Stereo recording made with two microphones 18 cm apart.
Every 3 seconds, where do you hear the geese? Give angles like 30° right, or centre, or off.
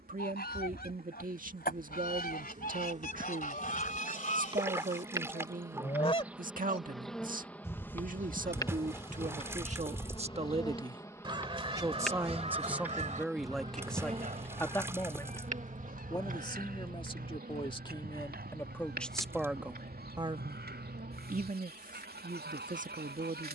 60° left, 40° left, 10° left, 20° right, 40° right, 60° right, 60° right, 70° right.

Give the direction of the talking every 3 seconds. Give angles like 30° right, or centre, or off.
50° right, 50° right, 50° right, 30° right, centre, 20° left, centre, 50° right.